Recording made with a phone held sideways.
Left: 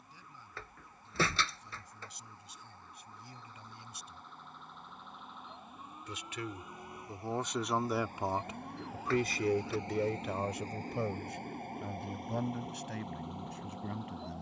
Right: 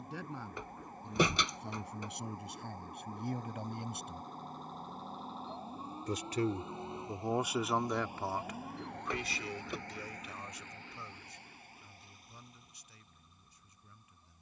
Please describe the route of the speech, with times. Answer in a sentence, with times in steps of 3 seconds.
In this clip you hear the speech on the right from 0 s, in the centre from 6 s and on the left from 9 s.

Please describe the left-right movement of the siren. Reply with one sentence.
You can hear the siren move from right to left.